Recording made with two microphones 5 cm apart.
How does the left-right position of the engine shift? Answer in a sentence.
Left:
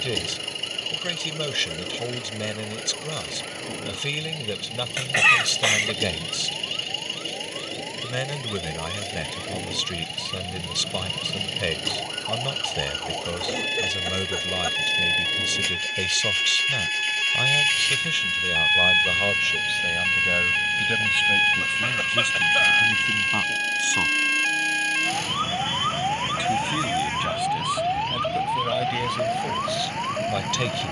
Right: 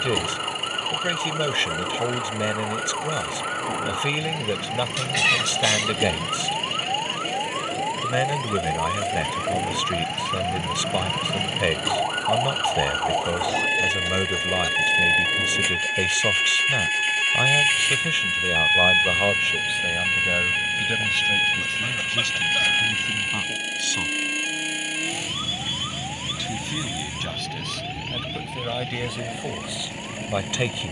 You can hear the engine stay in one place.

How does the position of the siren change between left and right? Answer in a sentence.
In this clip you hear the siren move to the left.